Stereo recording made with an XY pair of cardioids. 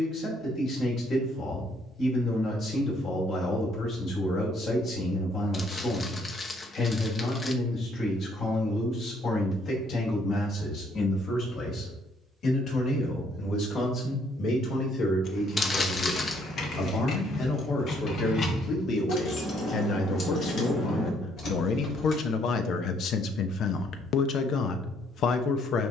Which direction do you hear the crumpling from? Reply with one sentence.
You can hear the crumpling on the left.